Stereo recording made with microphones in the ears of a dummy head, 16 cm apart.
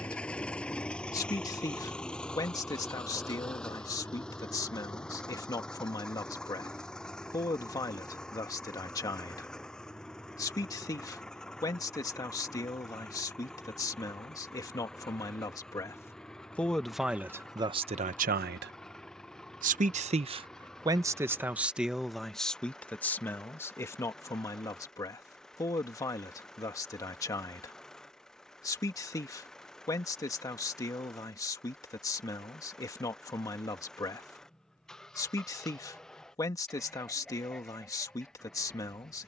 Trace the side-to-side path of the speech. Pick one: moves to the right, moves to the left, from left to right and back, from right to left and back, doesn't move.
from left to right and back.